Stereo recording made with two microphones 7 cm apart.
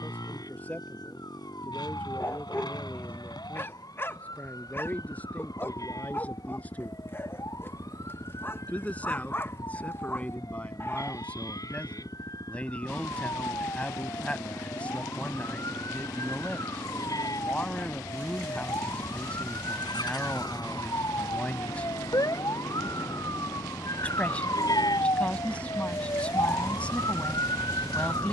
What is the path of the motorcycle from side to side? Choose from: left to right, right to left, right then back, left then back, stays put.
stays put.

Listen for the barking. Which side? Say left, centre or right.
left.